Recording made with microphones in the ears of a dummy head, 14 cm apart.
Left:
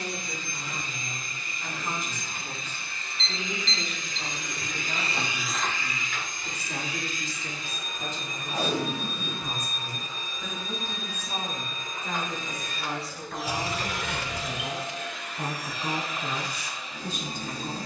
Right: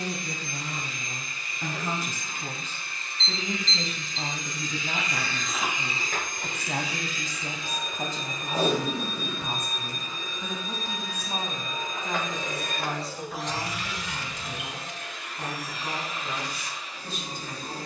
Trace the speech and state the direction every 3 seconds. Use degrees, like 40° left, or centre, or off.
70° right, 60° right, 40° right, 20° right, centre, 20° left.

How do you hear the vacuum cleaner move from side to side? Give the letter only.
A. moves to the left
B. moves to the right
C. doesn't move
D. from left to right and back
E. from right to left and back
D.